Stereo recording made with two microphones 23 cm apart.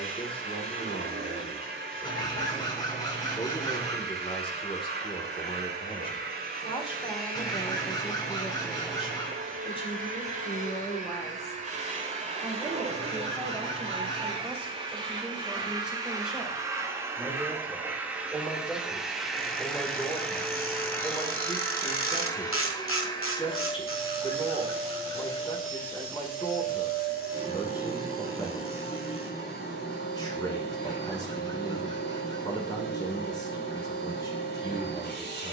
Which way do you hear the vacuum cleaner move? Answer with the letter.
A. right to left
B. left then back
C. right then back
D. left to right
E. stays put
A.